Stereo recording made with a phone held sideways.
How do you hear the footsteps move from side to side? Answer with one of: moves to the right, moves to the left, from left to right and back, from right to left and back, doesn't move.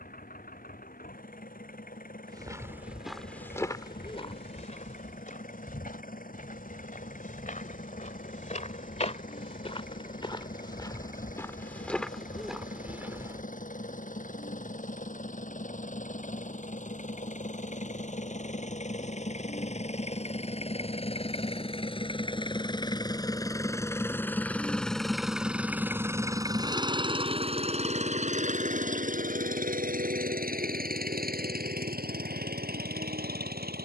from right to left and back.